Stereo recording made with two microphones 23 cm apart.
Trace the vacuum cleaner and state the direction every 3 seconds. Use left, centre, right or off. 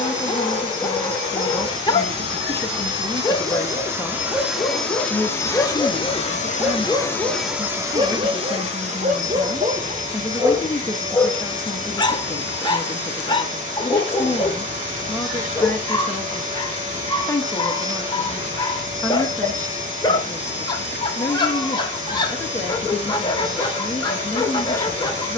right, centre, centre, right, right, right, right, right, right.